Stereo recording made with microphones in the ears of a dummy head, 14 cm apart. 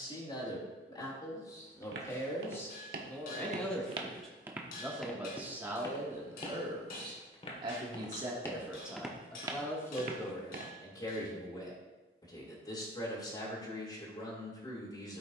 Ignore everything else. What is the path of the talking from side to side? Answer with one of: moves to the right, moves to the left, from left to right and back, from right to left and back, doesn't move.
from left to right and back.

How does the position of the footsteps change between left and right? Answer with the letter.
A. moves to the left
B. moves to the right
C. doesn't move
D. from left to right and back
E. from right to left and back
E.